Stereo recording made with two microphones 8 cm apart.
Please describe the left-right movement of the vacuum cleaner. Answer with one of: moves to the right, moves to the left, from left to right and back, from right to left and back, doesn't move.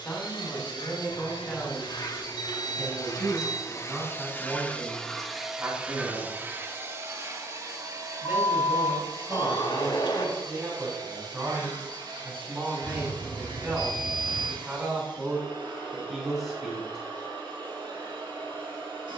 moves to the right.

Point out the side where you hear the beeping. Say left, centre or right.
left.